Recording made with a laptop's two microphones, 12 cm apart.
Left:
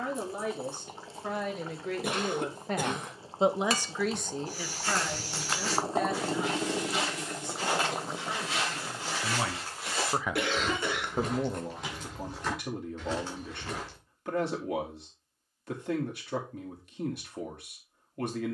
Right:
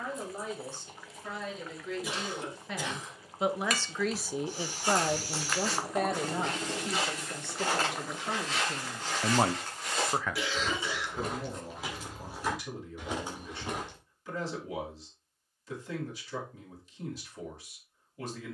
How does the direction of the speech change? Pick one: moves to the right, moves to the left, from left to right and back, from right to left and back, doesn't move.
from left to right and back.